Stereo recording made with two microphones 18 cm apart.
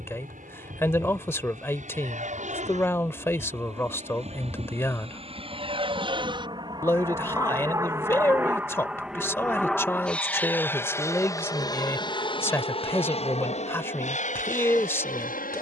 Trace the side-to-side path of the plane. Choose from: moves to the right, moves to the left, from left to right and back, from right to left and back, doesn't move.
moves to the left.